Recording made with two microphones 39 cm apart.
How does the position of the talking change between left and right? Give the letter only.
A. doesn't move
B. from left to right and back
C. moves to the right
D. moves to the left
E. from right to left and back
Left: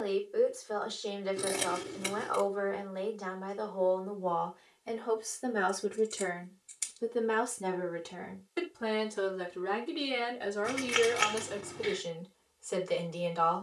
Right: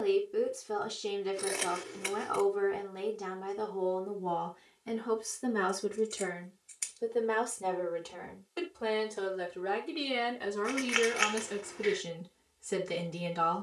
E.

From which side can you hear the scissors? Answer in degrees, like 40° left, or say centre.
50° left.